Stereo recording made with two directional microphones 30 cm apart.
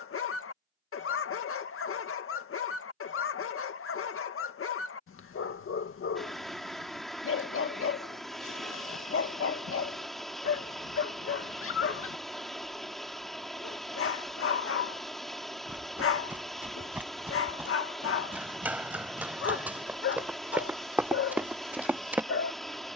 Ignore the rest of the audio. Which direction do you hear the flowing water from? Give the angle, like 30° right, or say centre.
centre.